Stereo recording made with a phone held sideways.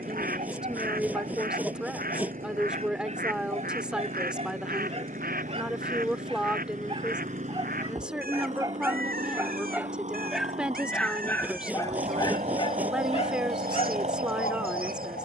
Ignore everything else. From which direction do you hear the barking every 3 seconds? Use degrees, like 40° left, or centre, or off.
50° right, 50° right, 30° right, centre, 50° left.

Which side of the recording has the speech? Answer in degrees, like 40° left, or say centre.
10° right.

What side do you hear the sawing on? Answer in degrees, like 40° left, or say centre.
10° right.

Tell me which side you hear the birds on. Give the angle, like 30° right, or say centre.
80° right.